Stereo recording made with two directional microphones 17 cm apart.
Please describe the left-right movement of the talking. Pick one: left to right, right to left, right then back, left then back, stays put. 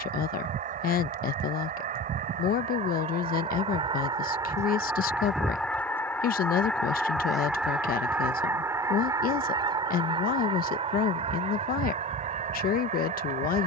stays put.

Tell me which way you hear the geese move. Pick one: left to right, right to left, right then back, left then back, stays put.
left then back.